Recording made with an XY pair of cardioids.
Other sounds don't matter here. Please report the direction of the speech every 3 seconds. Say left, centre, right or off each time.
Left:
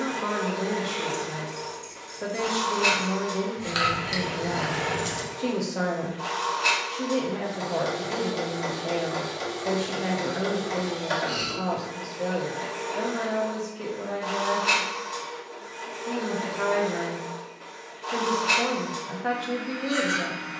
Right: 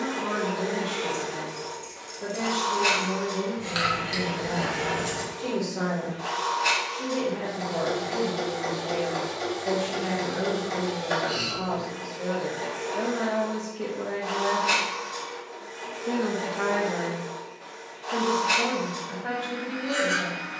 left, left, left, left, centre, centre, left.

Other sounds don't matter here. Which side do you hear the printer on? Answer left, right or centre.
left.